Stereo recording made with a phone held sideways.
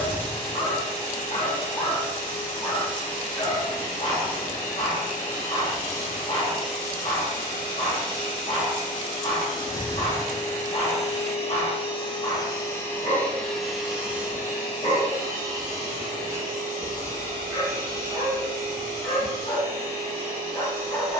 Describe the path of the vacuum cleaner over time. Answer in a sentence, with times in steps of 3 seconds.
In this clip you hear the vacuum cleaner on the left from 0 s, in the centre from 12 s and on the right from 15 s.